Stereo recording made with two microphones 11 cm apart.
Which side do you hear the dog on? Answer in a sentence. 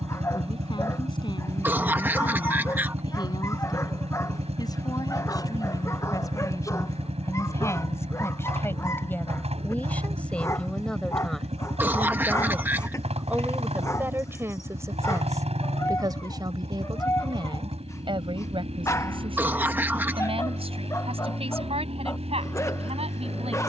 In this clip you hear the dog on the left.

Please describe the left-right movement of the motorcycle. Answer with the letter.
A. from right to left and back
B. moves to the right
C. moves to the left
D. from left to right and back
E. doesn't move
E.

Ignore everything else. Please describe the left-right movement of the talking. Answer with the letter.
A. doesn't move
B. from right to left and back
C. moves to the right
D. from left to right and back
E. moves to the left
C.